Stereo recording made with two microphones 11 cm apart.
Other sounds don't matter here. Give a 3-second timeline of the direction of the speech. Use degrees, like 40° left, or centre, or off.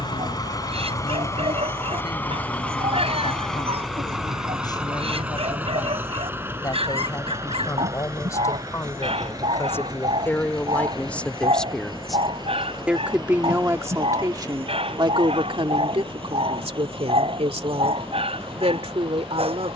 50° left, 40° left, 30° left, 20° left, 20° right, 60° right, 70° right.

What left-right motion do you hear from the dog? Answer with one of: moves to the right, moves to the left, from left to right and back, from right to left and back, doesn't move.
doesn't move.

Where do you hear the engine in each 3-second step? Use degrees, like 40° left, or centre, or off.
30° left, centre, 30° right, 40° right, 40° right, 50° right, 50° right.